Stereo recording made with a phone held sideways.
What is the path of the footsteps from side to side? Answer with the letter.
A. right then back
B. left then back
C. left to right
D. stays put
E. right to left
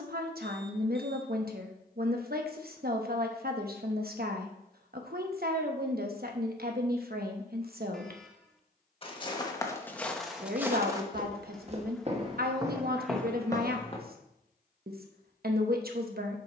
A.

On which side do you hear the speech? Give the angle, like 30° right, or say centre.
70° right.